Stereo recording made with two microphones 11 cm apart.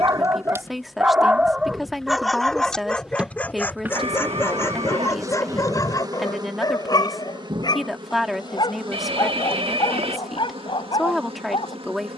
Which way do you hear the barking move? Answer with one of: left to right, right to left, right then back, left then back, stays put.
right to left.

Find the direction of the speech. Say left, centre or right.
centre.